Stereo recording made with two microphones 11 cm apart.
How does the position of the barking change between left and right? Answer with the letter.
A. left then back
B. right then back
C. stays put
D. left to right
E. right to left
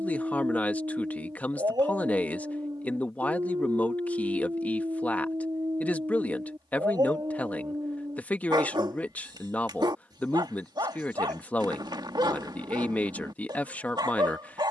C.